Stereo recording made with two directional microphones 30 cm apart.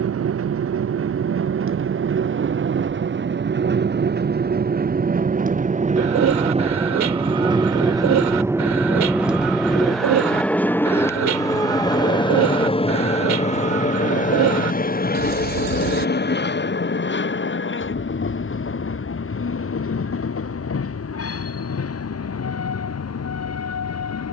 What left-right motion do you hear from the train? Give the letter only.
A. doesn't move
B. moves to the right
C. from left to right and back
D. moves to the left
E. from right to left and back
D.